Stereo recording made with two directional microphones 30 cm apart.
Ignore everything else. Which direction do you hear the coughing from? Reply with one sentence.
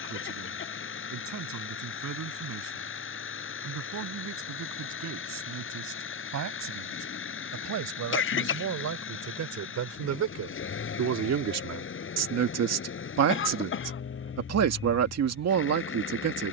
You can hear the coughing on the left.